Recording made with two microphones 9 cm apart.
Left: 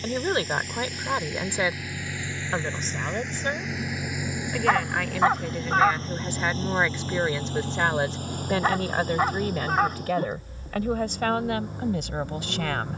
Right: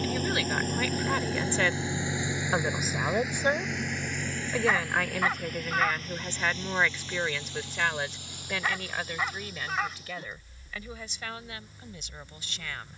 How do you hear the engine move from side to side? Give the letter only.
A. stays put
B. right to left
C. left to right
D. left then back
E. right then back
B.